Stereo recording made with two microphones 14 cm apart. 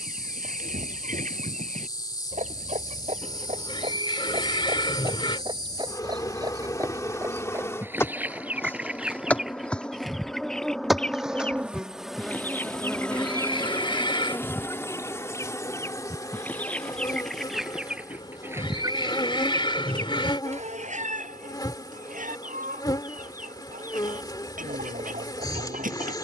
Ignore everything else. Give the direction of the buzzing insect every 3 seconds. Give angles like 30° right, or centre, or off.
30° left, 30° left, 20° left, centre, 10° left, 20° left, 30° left, 30° left, 30° left.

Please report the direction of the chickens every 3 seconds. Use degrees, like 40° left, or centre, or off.
70° right, 40° right, 20° right, centre, 20° left, 10° left, 30° right, 70° right, 70° right.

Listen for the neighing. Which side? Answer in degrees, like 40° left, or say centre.
40° left.